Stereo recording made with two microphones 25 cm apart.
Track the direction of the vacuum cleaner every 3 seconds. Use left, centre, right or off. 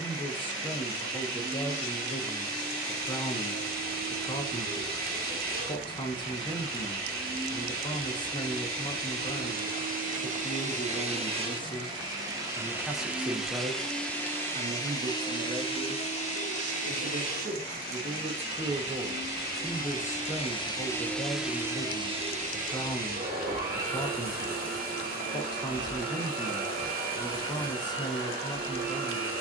right, right, right, right, centre, left, left, right, right, right.